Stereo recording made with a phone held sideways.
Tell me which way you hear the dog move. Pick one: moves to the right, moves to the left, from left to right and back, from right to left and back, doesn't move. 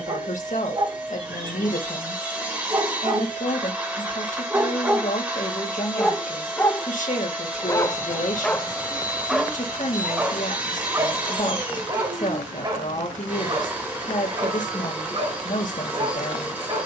from right to left and back.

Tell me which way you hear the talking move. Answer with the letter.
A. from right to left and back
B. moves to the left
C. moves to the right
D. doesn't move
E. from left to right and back
D.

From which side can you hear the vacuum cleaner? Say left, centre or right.
centre.